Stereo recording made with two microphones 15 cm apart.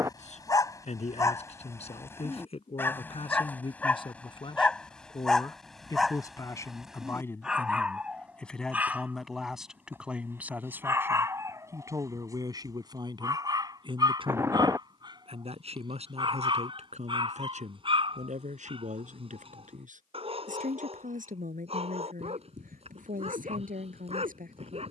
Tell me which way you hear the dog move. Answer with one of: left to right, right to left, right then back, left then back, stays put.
left to right.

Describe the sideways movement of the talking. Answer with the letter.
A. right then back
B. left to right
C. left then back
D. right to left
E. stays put
B.